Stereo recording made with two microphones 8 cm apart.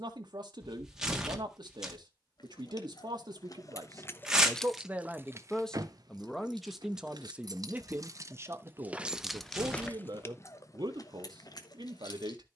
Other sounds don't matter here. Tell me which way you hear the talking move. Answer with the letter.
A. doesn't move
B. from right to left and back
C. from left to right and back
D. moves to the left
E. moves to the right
B.